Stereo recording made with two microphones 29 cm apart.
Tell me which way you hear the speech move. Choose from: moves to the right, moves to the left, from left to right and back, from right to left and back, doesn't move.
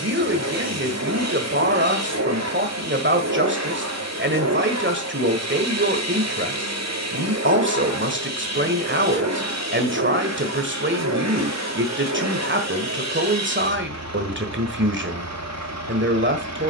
doesn't move.